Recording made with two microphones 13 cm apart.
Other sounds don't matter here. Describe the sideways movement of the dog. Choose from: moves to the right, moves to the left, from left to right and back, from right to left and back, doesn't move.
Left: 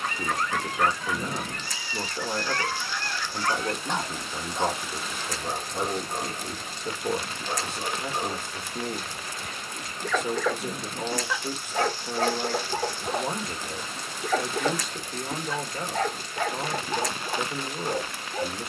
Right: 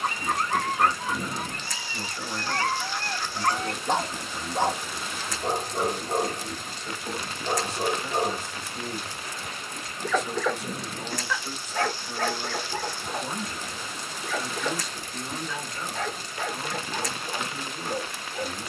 moves to the left.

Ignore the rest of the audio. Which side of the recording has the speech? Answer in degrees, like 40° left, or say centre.
60° left.